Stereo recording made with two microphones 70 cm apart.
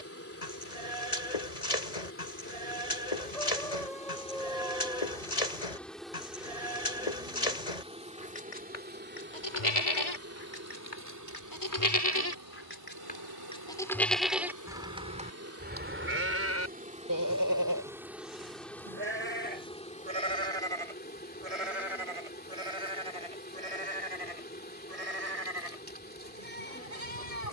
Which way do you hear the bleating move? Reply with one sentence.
In this clip you hear the bleating go from the left side to the right.